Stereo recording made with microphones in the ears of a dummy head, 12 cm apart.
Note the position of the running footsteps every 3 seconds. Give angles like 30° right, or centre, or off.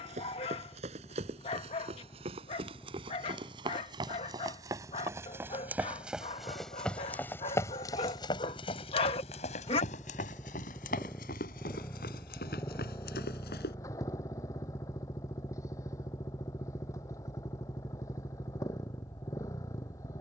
50° right, 30° right, 20° left, 60° left, 80° left, off, off.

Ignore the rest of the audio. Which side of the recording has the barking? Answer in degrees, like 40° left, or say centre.
40° left.